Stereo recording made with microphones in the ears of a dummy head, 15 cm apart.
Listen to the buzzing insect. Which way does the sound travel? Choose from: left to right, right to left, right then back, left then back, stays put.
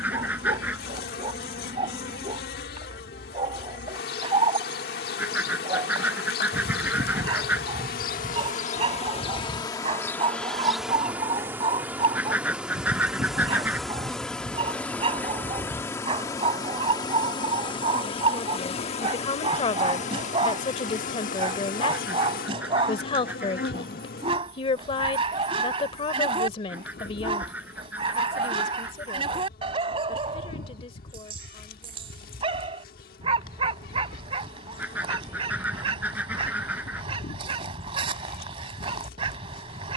right then back.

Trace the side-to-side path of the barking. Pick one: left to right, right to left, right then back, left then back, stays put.
stays put.